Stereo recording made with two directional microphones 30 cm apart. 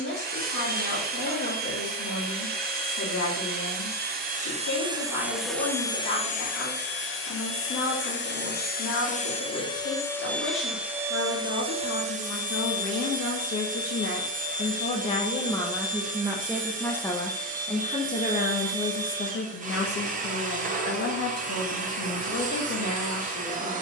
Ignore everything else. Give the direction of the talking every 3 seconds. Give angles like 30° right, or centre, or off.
60° left, 60° left, 60° left, 60° left, 50° left, 10° left, 40° left, 60° left.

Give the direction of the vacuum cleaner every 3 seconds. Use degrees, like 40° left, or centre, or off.
30° right, 20° right, 30° left, centre, 30° right, 30° right, 30° right, 30° right.